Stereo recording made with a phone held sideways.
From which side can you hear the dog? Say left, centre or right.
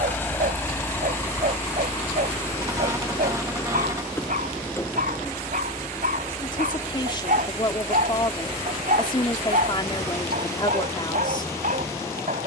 right.